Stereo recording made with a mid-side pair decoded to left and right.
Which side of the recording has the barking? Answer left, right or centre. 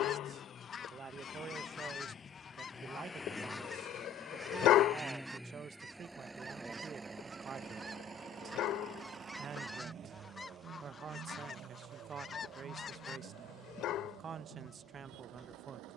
left.